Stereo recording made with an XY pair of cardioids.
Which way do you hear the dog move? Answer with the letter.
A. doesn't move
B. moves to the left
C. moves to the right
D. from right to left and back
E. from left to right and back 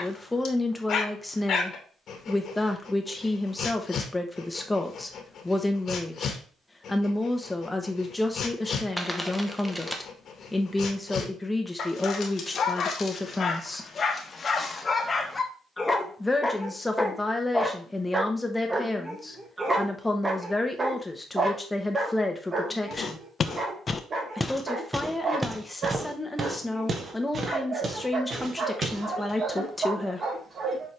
C.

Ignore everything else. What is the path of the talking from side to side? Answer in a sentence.
You can hear the talking stay put.